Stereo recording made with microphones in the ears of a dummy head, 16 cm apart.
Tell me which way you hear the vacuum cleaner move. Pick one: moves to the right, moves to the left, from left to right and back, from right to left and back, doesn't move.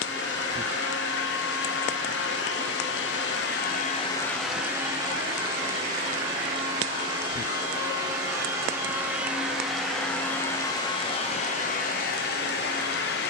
from left to right and back.